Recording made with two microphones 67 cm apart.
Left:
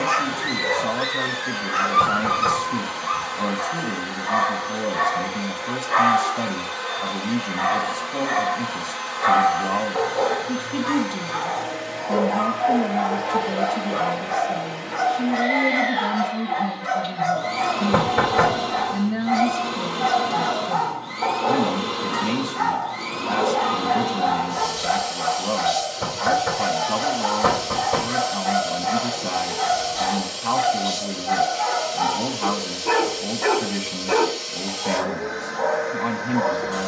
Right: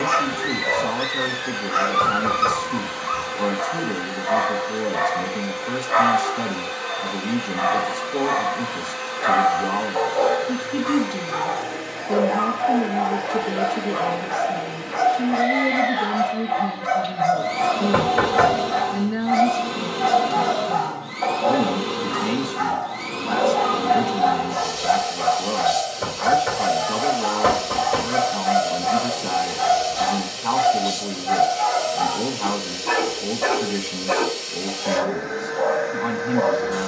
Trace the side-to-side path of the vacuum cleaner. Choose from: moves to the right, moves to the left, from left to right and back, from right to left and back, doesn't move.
doesn't move.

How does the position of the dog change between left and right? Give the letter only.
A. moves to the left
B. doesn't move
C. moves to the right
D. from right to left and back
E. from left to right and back
D.